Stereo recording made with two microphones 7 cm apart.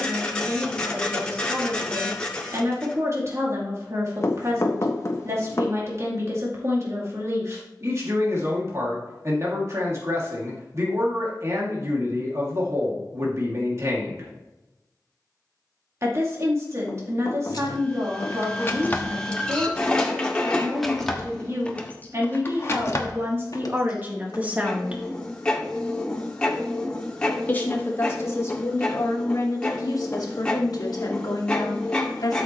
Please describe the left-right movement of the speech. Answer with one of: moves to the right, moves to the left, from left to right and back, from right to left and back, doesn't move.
moves to the left.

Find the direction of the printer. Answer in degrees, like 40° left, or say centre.
10° left.